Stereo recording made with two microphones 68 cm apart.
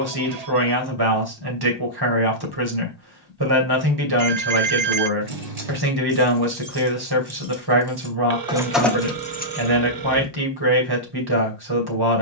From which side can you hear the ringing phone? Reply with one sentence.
You can hear the ringing phone on the right.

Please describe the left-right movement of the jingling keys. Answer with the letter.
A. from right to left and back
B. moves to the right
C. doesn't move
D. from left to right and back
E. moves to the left
E.